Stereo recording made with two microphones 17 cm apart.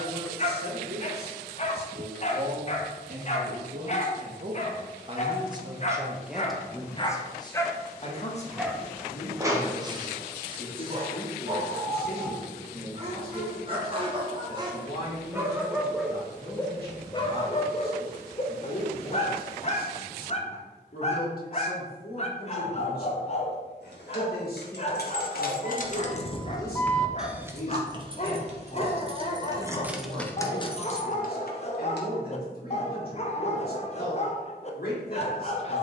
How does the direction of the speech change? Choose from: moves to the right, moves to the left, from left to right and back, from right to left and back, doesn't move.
moves to the left.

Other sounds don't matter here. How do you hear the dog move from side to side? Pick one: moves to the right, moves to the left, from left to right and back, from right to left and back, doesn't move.
from left to right and back.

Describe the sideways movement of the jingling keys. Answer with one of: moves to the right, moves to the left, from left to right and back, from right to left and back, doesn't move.
from left to right and back.